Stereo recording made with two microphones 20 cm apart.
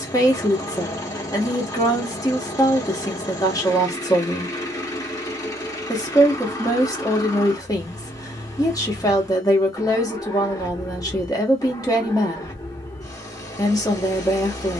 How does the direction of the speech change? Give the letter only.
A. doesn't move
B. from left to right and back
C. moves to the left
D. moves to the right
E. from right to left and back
A.